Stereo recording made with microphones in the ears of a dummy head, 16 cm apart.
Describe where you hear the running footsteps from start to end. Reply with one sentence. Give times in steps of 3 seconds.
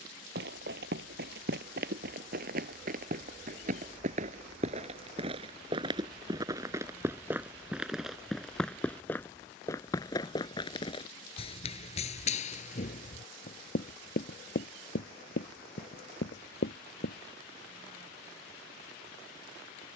You can hear the running footsteps on the right from 0 s, in the centre from 6 s, on the left from 9 s and not at all from 18 s.